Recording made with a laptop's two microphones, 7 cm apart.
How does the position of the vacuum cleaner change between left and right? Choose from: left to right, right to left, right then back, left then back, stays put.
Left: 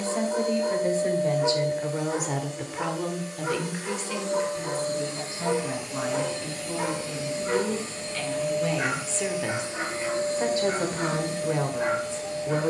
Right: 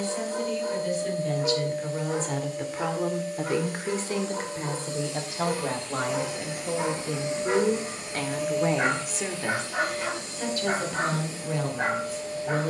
right then back.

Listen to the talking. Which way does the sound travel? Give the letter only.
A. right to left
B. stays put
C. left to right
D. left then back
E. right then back
E.